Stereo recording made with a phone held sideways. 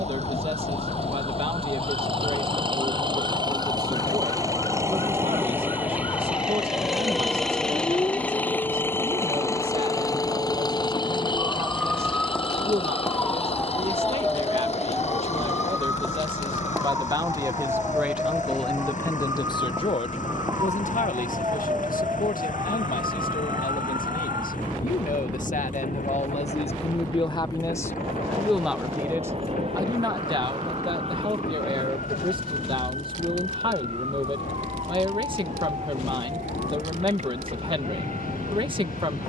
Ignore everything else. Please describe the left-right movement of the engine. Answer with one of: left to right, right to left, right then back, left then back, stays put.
right to left.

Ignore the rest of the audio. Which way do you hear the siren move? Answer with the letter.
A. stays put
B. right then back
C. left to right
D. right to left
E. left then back
C.